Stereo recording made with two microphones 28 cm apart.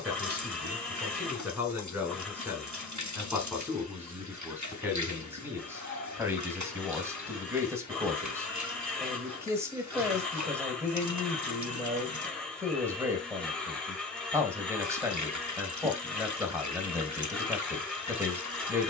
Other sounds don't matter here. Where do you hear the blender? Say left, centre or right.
centre.